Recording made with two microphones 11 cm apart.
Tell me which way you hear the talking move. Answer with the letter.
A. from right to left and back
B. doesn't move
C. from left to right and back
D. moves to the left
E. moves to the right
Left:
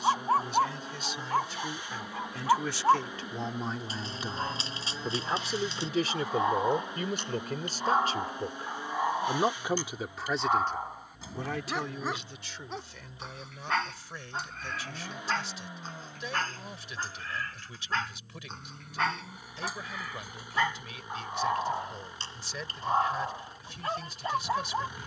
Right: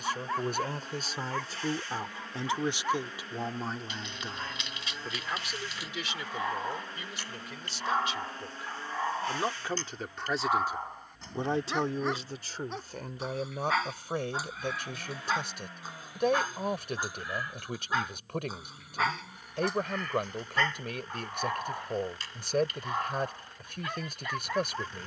A.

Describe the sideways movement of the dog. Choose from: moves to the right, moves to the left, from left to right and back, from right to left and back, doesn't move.
from left to right and back.